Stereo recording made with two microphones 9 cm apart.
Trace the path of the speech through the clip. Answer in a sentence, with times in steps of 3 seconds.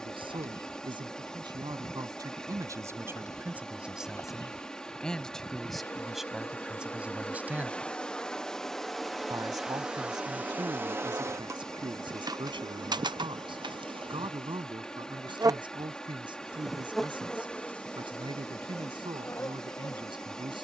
In this clip you hear the speech on the right from 0 s, in the centre from 3 s and on the right from 9 s.